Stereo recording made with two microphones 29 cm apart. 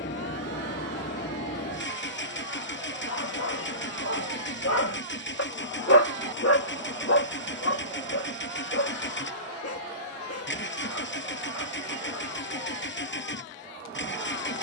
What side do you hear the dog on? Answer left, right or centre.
left.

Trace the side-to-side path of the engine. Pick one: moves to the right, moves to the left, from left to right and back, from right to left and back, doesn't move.
doesn't move.